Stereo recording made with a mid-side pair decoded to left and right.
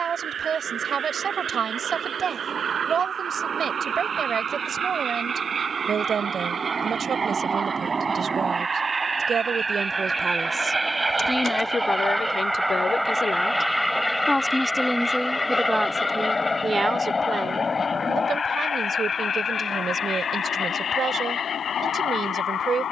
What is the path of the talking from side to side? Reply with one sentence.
In this clip you hear the talking move from right to left and back again.